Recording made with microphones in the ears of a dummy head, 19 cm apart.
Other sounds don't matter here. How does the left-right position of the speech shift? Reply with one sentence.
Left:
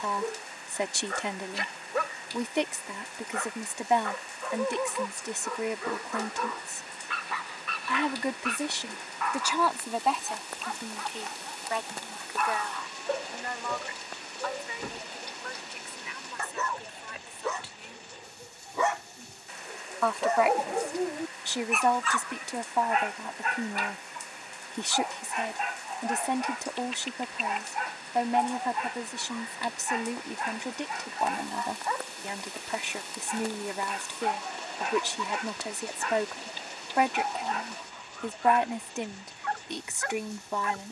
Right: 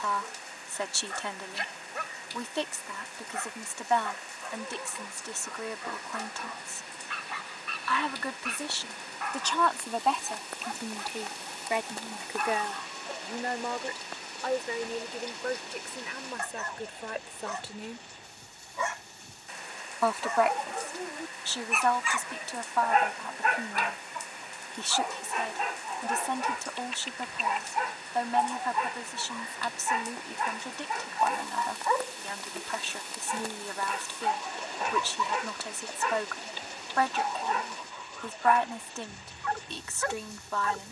In this clip you hear the speech go right and come back.